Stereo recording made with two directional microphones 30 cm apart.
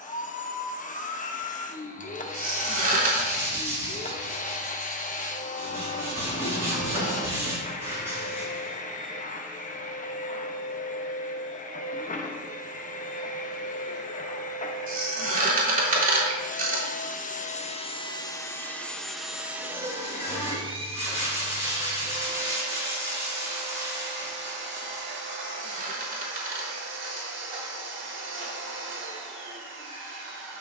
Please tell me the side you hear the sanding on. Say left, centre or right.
centre.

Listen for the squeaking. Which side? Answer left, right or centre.
right.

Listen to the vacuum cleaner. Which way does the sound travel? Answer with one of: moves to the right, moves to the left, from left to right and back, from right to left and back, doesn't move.
moves to the right.